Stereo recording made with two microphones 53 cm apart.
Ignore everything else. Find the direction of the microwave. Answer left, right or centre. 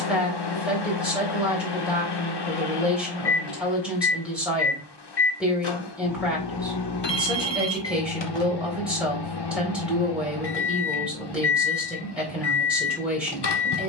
left.